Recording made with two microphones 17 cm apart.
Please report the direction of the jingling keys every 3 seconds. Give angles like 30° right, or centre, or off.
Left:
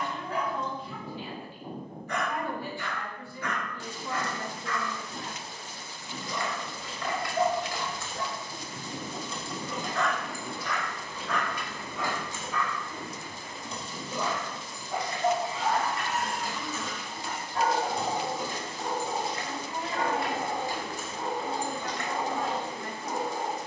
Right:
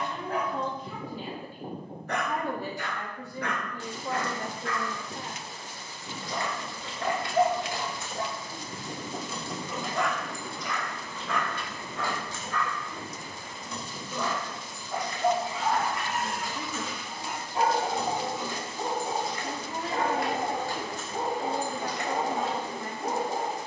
off, off, 30° right, 10° left, 30° left, 40° left, 30° left, 10° right.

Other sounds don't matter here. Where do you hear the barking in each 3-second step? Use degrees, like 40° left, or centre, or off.
60° right, 60° right, 40° right, 10° right, 10° left, 10° right, 40° right, 50° right.